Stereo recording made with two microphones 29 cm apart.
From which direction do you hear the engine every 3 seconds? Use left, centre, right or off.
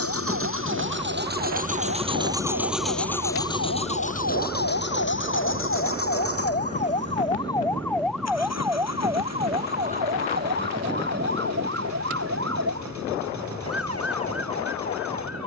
right, left, left, left, left.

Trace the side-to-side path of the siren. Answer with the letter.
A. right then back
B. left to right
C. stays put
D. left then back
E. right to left
B.